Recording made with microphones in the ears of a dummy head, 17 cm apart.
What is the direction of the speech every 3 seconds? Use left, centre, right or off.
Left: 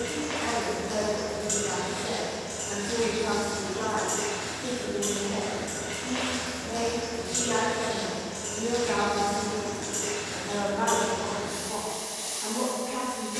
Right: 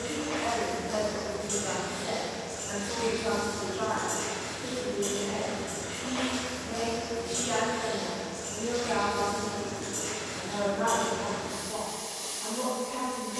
right, right, centre, left, left.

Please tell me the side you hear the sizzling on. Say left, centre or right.
centre.